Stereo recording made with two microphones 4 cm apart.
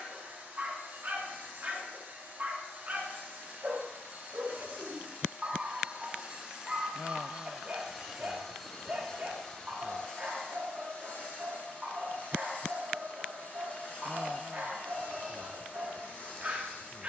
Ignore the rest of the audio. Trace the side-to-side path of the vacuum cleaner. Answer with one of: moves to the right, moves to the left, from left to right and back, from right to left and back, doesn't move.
moves to the left.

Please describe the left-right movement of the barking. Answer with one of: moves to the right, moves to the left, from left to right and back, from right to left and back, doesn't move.
doesn't move.